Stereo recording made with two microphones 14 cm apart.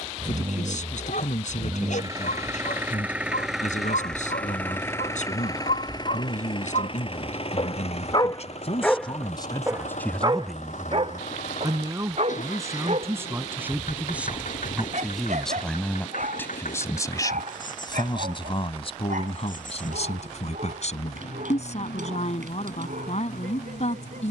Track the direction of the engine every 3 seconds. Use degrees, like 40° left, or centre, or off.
30° right, 10° left, 50° left, 60° left, 70° left, 80° left, 80° left, 80° left.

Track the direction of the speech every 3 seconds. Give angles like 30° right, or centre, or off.
70° left, 70° left, 60° left, 10° left, 20° right, 20° left, 50° left, 60° left.